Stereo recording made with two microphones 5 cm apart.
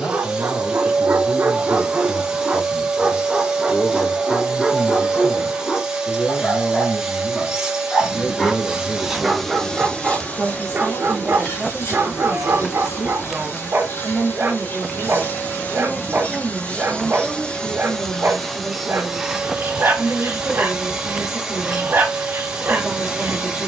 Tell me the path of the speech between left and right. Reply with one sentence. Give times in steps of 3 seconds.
In this clip you hear the speech on the left from 0 s and in the centre from 9 s.